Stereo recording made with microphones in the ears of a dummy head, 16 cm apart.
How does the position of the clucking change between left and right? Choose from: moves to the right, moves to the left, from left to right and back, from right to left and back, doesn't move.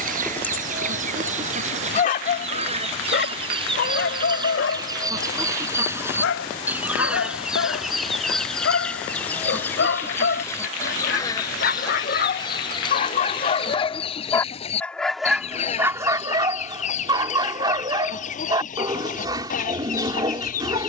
moves to the left.